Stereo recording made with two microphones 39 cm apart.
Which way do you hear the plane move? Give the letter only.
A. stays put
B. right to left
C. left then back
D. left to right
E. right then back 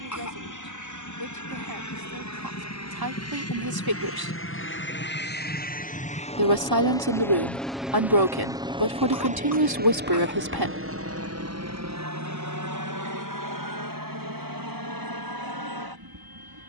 D.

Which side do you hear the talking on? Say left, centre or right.
right.